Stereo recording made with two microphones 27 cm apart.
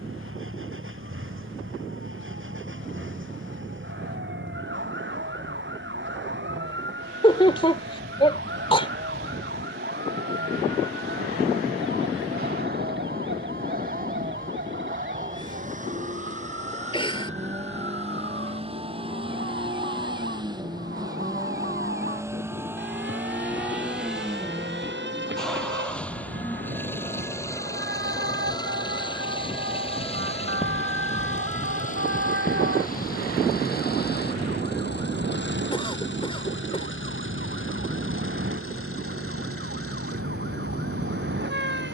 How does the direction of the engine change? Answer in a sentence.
You can hear the engine move from right to left.